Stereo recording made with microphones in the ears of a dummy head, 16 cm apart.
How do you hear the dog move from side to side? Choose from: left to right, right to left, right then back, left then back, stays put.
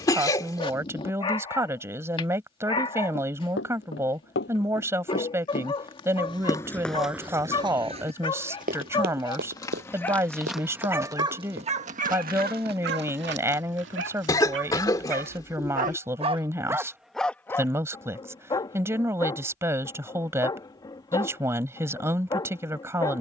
right then back.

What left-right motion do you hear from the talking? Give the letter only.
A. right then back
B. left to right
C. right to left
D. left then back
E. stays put
E.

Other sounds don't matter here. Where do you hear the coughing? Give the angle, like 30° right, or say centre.
20° left.